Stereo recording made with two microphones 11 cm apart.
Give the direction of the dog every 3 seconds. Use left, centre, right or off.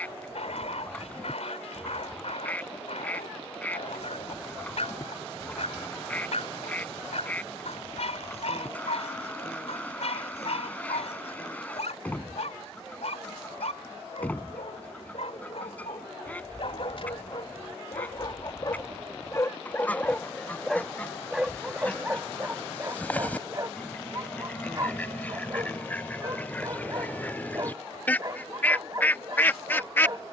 left, left, left, left, left, left, left, right, right, right.